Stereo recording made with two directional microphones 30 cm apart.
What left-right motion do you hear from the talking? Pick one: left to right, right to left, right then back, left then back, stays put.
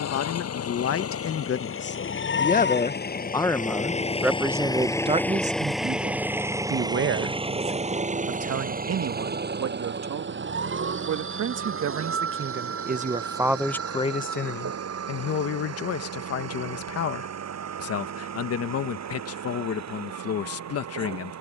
right then back.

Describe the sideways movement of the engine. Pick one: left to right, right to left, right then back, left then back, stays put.
left to right.